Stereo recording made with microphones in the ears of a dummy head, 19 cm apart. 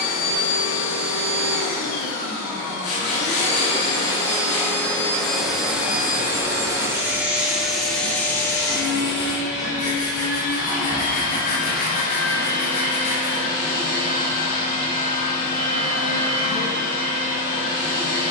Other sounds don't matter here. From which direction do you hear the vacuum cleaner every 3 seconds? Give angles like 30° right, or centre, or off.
40° left, 20° left, centre, 40° left, 40° left, 40° left.